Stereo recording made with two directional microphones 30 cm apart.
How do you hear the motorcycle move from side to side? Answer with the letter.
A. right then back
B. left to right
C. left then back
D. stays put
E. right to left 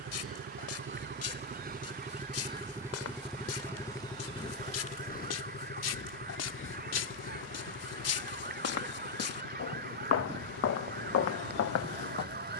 E.